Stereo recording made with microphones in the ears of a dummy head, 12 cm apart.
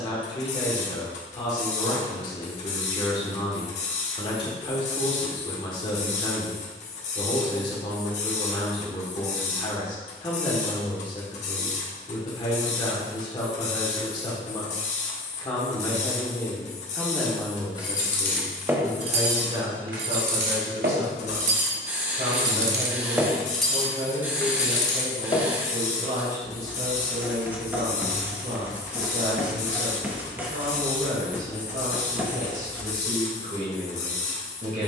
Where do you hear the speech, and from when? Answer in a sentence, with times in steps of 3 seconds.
You can hear the speech on the left from 0 s, in the centre from 15 s and on the right from 18 s.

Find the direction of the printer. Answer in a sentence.
In this clip you hear the printer on the left.